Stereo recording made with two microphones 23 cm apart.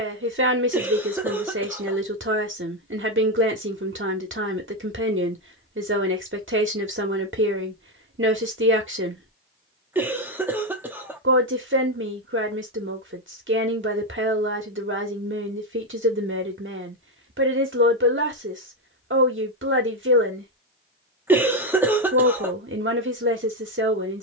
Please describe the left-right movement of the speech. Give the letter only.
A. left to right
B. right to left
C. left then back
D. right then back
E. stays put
E.